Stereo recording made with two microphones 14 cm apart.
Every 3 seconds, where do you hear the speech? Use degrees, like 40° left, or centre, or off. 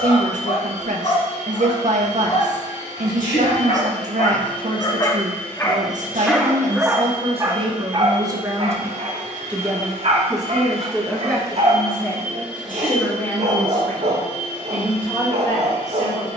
60° right, 60° right, 40° right, centre, 10° left, 20° left.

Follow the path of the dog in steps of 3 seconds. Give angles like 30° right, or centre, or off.
50° left, 40° left, 20° right, 50° right, 50° right, 50° right.